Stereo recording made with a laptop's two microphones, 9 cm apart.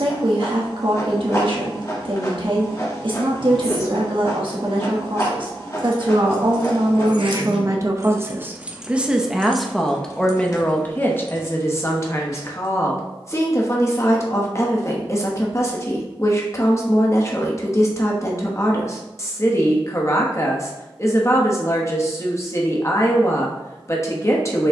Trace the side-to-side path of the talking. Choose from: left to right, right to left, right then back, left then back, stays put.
right to left.